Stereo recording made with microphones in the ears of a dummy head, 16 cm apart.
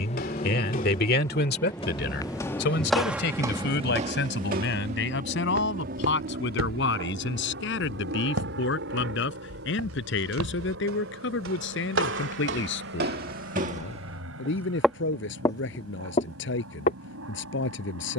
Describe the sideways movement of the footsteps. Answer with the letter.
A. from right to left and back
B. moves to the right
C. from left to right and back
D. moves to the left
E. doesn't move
C.